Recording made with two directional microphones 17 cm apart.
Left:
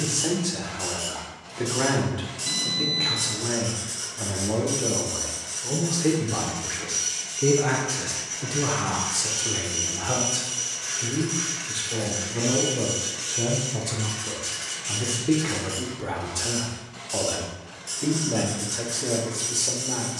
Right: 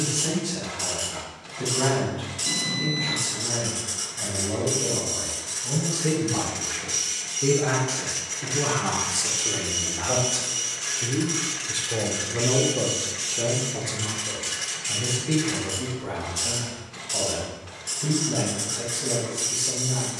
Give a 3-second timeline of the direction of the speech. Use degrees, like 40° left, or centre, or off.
50° left, 40° left, 20° left, 10° right, centre, 40° left, 50° left.